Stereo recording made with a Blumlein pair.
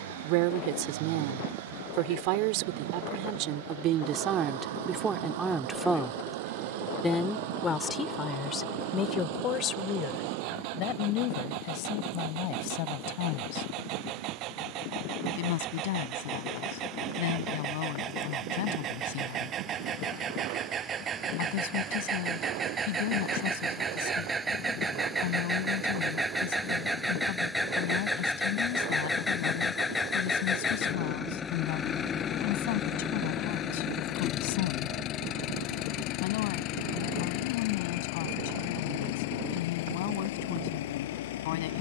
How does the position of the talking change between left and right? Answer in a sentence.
You can hear the talking travel towards the left.